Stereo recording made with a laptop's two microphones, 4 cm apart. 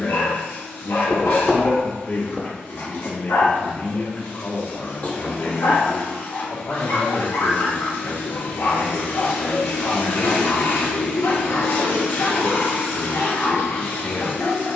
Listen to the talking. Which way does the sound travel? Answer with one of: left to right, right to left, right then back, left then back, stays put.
stays put.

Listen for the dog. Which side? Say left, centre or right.
left.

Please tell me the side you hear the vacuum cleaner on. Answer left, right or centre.
left.